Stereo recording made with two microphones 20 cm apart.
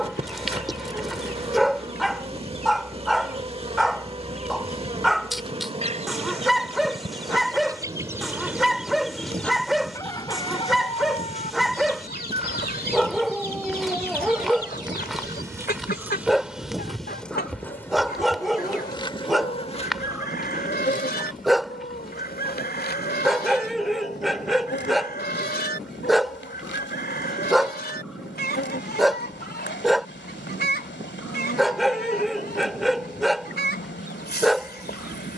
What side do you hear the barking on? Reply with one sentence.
In this clip you hear the barking in the centre.